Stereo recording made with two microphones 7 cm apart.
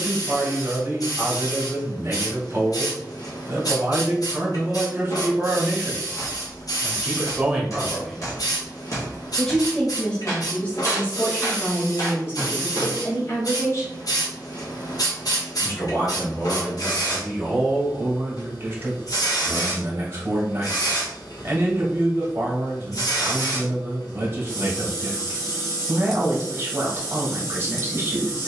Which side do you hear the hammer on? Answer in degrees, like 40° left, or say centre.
50° left.